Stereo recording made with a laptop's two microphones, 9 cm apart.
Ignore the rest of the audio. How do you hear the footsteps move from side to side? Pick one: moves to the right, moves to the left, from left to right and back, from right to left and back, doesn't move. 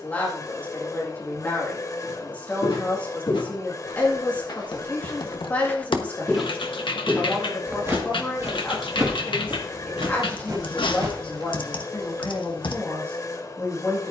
moves to the right.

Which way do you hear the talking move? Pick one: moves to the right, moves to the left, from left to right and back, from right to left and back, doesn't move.
doesn't move.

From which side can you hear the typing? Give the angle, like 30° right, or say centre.
70° left.